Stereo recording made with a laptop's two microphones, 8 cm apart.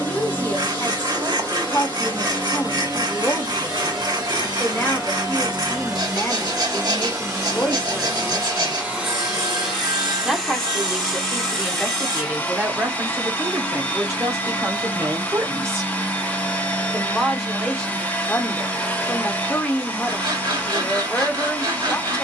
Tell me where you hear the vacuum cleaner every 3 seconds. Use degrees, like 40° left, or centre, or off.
60° right, 50° right, 30° right, centre, 20° left, 20° left, 20° left, 20° left.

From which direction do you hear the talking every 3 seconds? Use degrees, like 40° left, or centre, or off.
20° left, 20° left, 20° left, 10° right, 30° right, 20° right, 20° left, 20° left.